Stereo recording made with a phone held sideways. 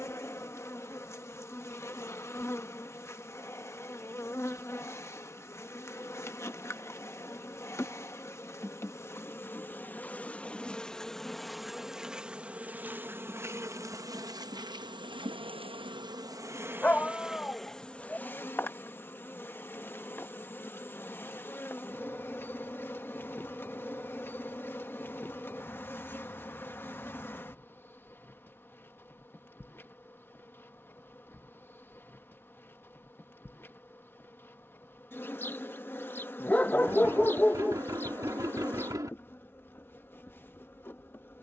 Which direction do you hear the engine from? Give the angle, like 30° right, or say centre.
20° right.